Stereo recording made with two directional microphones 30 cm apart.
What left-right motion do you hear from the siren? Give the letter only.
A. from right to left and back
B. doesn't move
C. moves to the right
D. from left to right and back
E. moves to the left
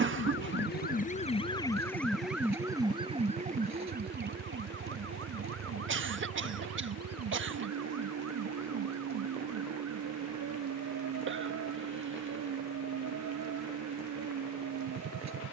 C.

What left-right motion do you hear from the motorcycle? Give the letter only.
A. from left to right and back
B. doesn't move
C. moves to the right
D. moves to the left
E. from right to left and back
B.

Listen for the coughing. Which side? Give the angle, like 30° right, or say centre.
40° right.